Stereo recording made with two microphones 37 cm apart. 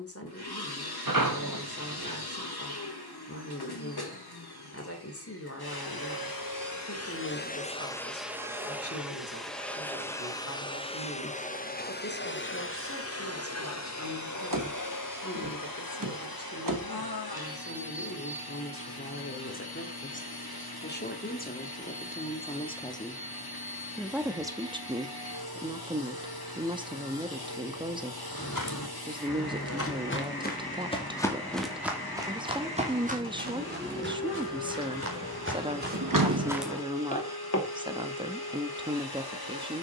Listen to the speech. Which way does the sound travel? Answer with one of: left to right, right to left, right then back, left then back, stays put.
left to right.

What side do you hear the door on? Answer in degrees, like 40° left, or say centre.
60° right.